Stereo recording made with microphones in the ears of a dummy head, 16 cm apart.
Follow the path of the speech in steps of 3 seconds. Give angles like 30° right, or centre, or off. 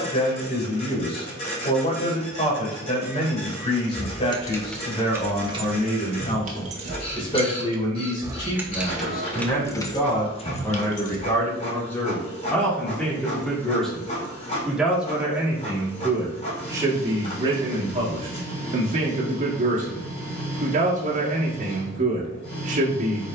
30° left, 30° left, 30° left, 20° left, centre, 20° right, 40° right, 40° right.